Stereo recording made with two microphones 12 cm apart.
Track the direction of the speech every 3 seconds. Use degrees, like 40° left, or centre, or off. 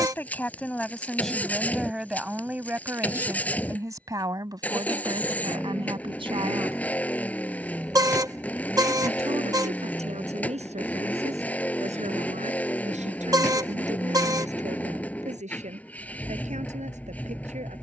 centre, 30° right, 50° right, 60° right, 70° right, 80° right.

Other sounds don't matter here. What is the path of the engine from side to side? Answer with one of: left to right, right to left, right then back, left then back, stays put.
stays put.